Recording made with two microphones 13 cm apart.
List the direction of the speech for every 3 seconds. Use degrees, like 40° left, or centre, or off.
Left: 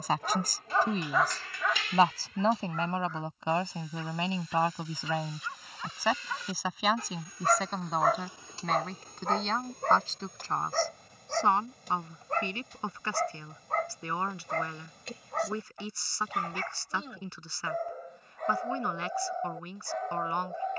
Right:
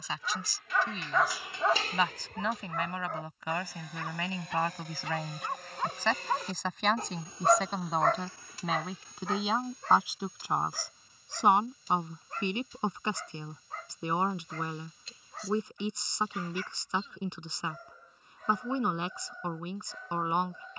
40° left, 20° left, centre, 10° right, 20° right, 20° right, 20° right.